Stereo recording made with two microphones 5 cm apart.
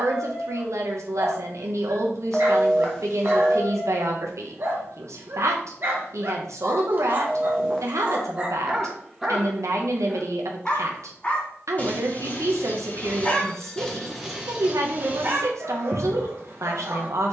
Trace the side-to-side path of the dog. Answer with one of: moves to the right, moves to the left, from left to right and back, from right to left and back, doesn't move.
from right to left and back.